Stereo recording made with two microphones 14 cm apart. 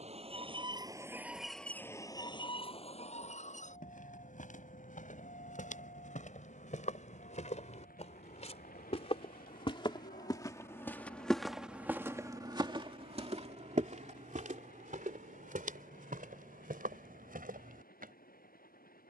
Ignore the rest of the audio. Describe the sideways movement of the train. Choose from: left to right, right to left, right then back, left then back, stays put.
right to left.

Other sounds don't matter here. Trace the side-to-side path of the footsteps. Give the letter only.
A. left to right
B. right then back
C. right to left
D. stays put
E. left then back
A.